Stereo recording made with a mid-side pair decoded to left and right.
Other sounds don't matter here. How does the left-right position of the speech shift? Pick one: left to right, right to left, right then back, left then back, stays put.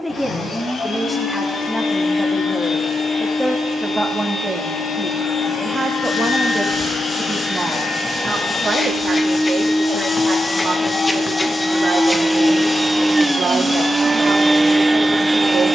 left to right.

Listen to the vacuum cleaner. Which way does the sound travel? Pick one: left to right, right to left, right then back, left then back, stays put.
left to right.